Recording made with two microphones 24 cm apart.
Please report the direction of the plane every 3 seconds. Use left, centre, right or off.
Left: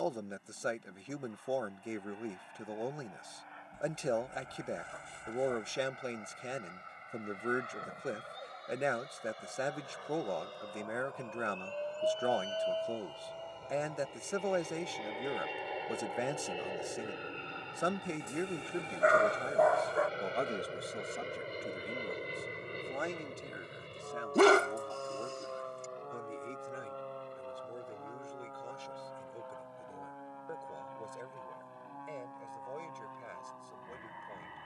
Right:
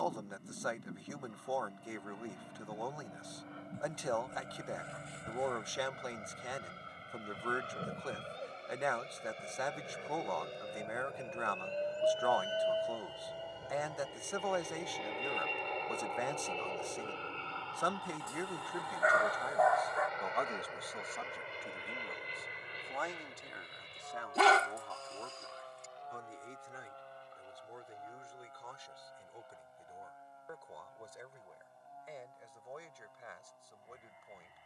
right, right, right, right, centre, centre, left, left, left, left, left, left.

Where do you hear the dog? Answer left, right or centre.
left.